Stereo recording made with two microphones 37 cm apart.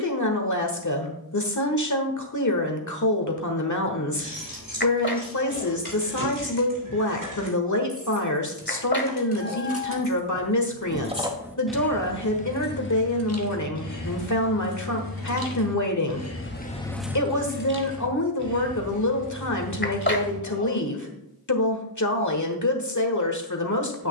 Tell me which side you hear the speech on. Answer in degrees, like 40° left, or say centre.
50° left.